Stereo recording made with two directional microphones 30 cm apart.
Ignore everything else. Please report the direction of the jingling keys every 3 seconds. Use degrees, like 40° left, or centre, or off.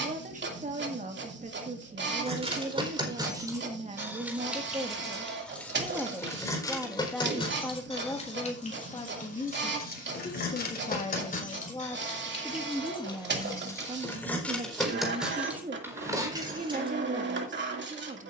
20° right, centre, 20° left, 30° left, 10° left, 10° right.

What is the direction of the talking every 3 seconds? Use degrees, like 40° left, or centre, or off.
30° right, 20° right, 10° left, 20° left, 10° right, 20° right.